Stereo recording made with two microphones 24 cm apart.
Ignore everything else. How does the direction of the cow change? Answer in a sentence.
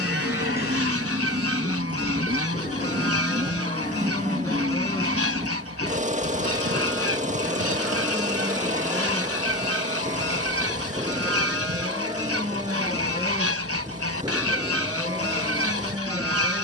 In this clip you hear the cow travel towards the right.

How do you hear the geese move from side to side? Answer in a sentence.
In this clip you hear the geese stay put.